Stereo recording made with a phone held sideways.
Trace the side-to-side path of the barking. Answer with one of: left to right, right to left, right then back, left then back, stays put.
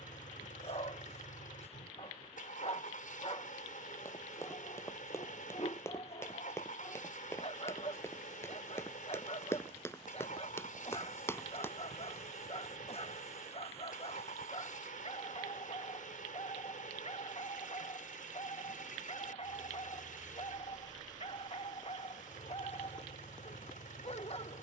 stays put.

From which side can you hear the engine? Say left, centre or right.
left.